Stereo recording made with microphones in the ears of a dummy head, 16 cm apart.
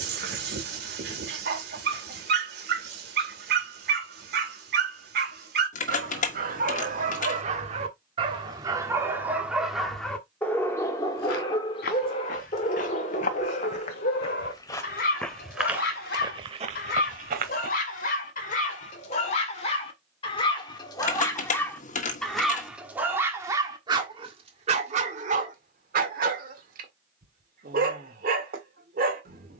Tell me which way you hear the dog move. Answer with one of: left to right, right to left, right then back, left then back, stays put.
left then back.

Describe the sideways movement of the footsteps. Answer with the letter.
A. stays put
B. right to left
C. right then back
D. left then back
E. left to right
E.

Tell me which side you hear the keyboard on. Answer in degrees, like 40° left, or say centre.
40° left.